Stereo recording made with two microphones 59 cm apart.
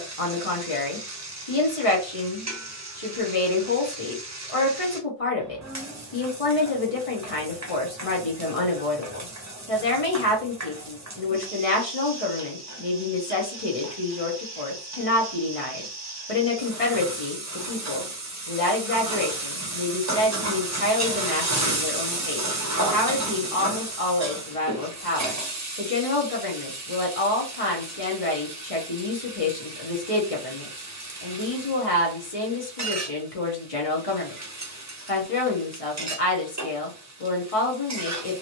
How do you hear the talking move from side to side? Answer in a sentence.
You can hear the talking stay in one place.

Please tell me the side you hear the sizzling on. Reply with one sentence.
You can hear the sizzling on the right.